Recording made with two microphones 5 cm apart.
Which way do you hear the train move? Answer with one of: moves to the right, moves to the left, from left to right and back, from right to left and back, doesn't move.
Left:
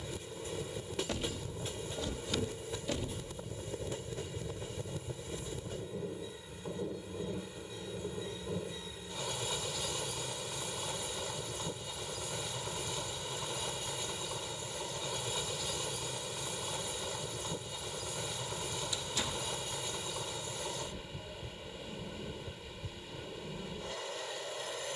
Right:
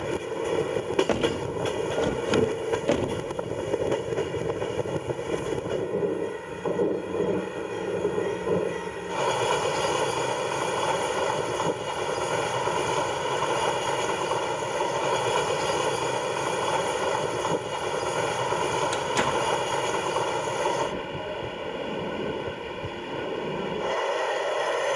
doesn't move.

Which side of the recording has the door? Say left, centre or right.
right.